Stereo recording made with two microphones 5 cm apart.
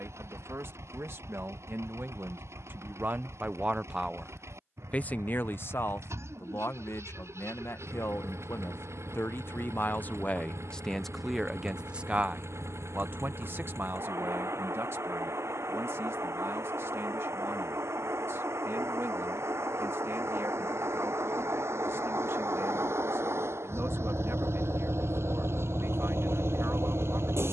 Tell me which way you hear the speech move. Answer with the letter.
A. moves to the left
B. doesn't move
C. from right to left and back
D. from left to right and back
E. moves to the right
C.